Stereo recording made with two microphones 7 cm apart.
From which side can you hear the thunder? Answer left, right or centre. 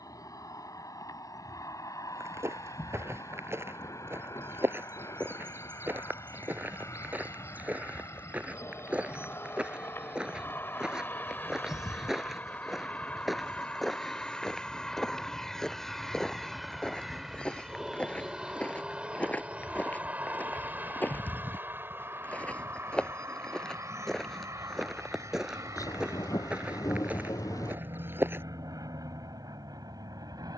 left.